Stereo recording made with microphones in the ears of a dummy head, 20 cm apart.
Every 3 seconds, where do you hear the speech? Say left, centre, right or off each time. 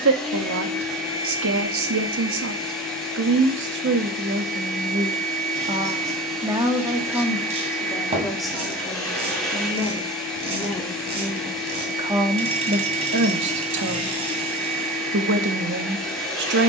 right, right, centre, centre, right, right.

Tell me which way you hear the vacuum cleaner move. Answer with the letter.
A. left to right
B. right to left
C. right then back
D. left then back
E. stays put
E.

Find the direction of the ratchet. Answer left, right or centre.
right.